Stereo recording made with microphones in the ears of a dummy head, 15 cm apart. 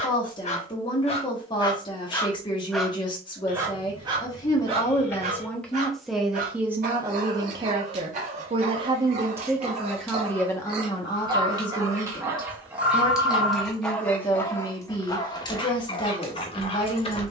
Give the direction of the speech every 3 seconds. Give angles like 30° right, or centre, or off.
30° left, 20° left, 20° right, 10° left, 30° left, 30° left.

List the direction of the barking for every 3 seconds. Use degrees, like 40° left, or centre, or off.
30° left, 30° right, 50° right, 30° right, centre, 30° left.